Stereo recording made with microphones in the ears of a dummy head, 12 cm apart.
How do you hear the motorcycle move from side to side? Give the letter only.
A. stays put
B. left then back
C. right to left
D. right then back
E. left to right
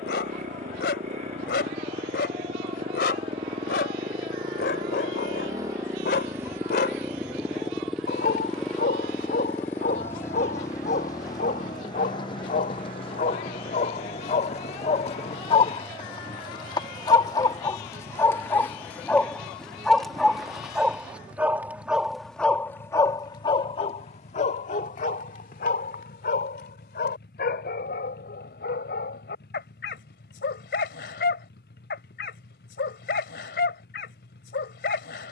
C.